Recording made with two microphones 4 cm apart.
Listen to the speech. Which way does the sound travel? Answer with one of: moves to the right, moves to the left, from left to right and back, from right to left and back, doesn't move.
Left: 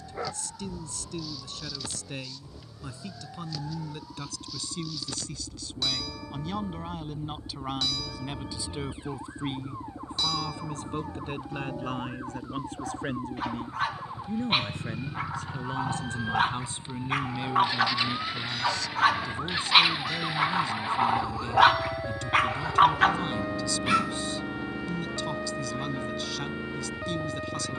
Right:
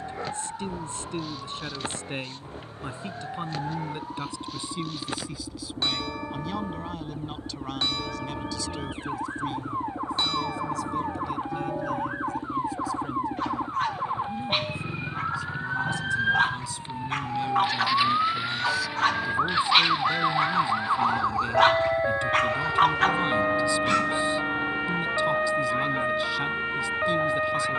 from right to left and back.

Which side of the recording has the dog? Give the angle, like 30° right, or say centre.
10° left.